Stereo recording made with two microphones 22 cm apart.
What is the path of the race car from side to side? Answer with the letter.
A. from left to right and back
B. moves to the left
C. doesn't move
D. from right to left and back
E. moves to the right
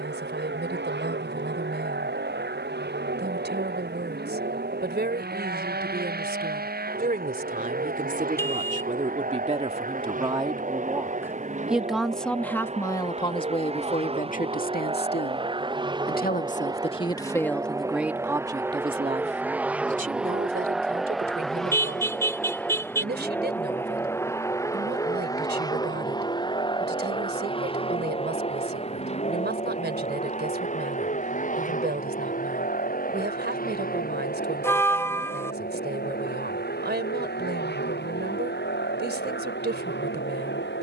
B.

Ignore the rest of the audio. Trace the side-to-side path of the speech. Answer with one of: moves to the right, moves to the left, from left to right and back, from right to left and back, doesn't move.
from right to left and back.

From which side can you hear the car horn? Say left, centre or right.
centre.